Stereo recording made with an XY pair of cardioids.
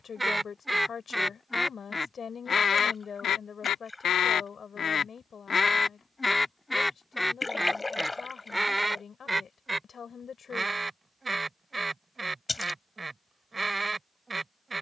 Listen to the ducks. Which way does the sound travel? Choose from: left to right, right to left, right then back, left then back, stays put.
left then back.